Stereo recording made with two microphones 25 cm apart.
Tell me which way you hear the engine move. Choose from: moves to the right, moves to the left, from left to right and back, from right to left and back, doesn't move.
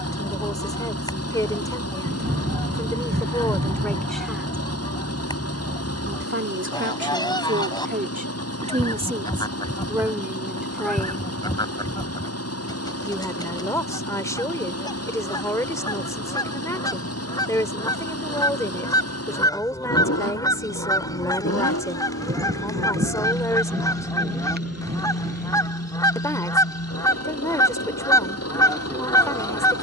doesn't move.